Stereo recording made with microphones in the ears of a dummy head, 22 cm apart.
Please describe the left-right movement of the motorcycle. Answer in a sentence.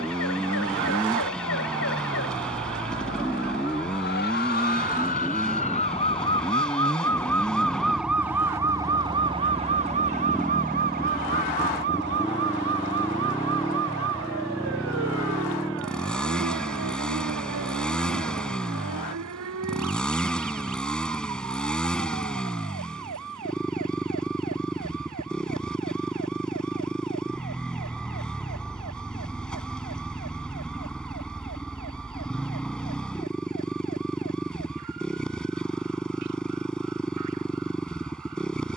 In this clip you hear the motorcycle stay in one place.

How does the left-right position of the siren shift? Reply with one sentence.
In this clip you hear the siren go from the left side to the right.